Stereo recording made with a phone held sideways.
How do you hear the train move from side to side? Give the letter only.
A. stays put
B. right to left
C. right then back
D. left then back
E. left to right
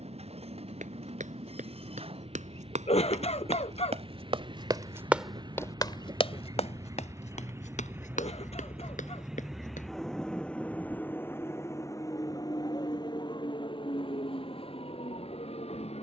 B.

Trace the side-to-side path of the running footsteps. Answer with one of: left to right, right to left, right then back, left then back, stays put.
right to left.